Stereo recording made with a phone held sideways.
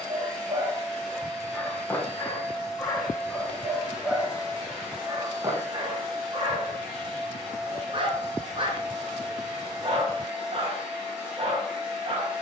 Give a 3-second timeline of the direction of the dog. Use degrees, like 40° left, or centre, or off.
centre, 10° right, 40° right, 40° right.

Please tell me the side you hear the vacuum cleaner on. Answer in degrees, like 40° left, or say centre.
centre.